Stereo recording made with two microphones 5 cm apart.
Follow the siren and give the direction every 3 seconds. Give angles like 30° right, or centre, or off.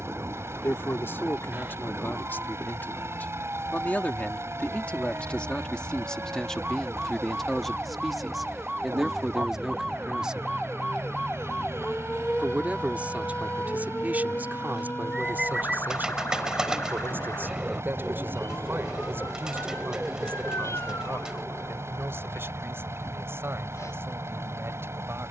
50° right, 40° right, 20° right, centre, 30° left, 50° left, 60° left, 70° left, 80° left.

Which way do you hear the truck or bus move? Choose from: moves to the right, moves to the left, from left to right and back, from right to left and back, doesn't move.
doesn't move.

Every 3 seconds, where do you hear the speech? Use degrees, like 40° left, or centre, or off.
50° left, 30° left, 10° left, 10° right, 30° right, 40° right, 50° right, 50° right, 50° right.